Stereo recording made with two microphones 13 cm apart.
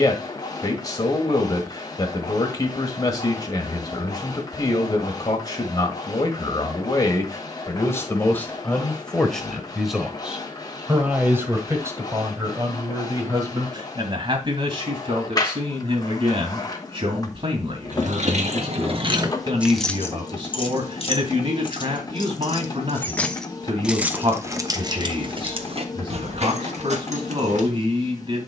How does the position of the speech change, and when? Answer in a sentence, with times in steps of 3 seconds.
In this clip you hear the speech on the left from 0 s, in the centre from 9 s and on the right from 12 s.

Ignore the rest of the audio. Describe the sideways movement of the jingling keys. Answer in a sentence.
You can hear the jingling keys move from right to left and back again.